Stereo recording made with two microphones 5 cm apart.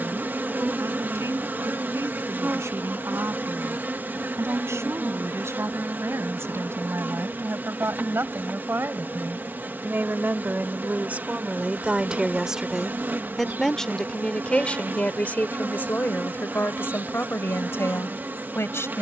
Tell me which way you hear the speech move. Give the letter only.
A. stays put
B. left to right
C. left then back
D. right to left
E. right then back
D.